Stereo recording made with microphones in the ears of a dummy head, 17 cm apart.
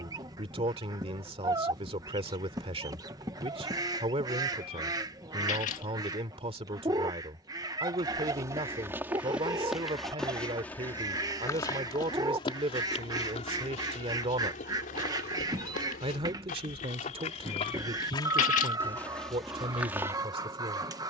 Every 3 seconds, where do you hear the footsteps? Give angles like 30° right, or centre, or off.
off, off, 20° right, 10° left, 30° left, 40° left, centre.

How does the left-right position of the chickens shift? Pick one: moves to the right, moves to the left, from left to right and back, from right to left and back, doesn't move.
doesn't move.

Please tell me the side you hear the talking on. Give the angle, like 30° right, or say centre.
30° right.